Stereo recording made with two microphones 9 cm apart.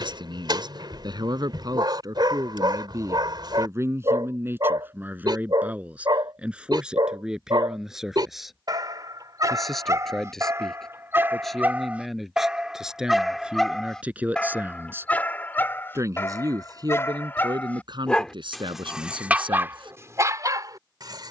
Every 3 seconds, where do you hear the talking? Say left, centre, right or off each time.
right, right, centre, centre, centre, right, right.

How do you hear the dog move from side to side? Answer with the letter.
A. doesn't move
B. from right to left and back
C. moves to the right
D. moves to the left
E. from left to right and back
B.